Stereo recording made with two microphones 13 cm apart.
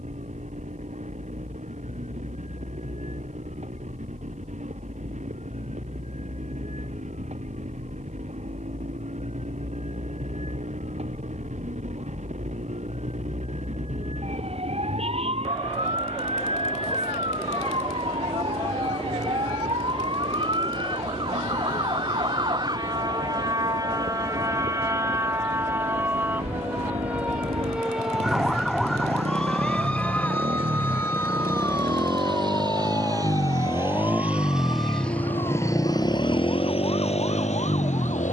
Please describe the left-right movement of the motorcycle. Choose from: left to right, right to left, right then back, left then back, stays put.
right to left.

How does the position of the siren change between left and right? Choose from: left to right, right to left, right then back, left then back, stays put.
right to left.